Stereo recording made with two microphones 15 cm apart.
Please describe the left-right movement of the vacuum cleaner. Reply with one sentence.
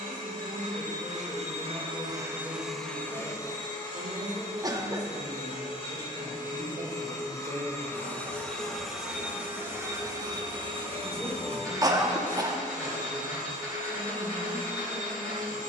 In this clip you hear the vacuum cleaner move from right to left and back again.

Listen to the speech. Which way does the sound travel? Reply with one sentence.
In this clip you hear the speech move from left to right and back again.